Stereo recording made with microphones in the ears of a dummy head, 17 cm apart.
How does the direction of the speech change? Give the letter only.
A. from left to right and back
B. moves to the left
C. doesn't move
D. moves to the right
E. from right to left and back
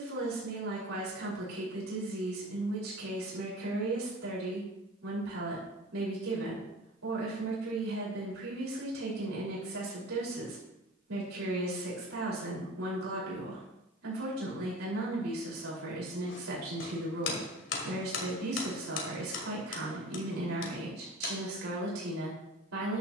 C.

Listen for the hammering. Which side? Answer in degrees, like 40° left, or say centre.
70° left.